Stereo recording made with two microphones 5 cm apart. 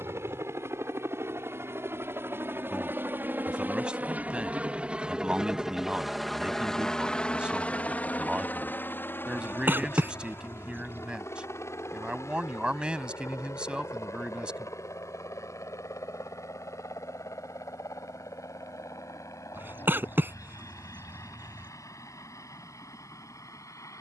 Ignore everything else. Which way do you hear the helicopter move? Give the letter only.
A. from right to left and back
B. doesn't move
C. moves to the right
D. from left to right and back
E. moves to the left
E.